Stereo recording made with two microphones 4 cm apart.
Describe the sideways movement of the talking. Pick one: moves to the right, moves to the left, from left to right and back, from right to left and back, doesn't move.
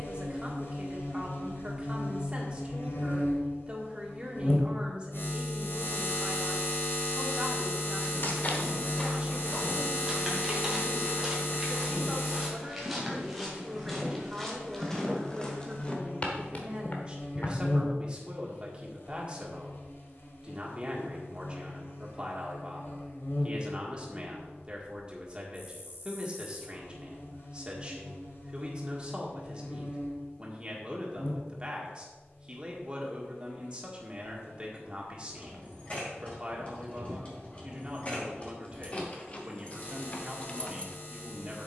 doesn't move.